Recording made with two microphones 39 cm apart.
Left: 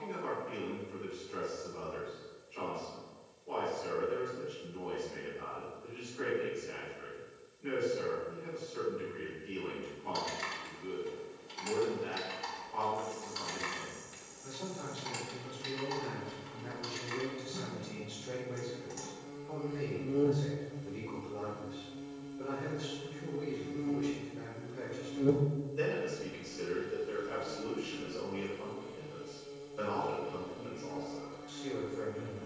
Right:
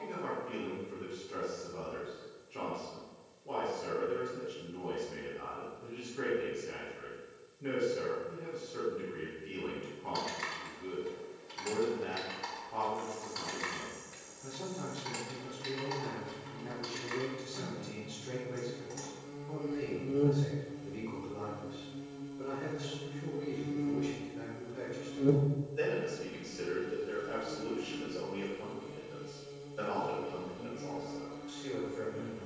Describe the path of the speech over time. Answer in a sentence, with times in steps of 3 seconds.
In this clip you hear the speech on the right from 0 s and in the centre from 21 s.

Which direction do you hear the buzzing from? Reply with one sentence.
In this clip you hear the buzzing in the centre.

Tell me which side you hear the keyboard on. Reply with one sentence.
You can hear the keyboard on the left.